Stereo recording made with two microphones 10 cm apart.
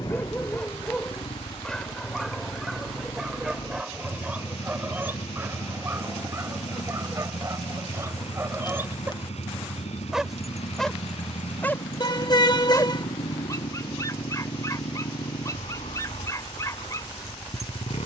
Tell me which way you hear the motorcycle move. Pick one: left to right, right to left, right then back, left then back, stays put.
stays put.